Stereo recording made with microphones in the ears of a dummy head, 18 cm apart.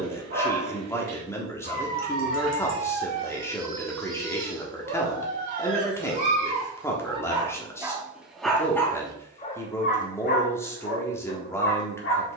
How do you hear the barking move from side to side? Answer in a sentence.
You can hear the barking go from the right side to the left.